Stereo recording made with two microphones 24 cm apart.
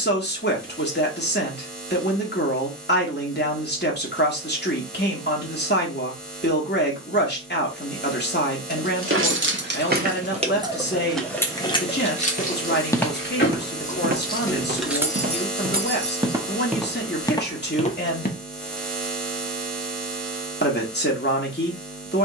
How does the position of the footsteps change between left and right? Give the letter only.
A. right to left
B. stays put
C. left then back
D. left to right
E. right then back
E.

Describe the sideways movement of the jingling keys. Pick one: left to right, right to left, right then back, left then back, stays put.
left then back.